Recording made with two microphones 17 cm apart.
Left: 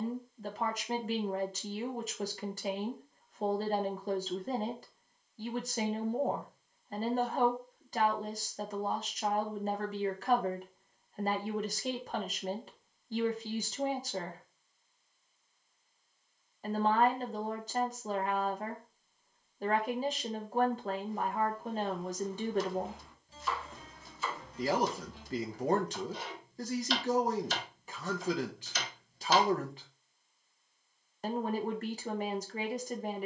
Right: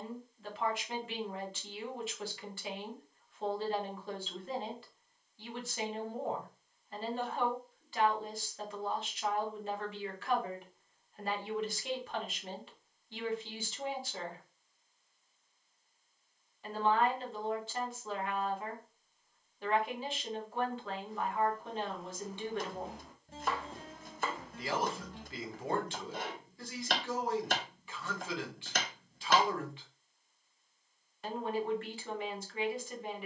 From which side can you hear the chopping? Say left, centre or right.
right.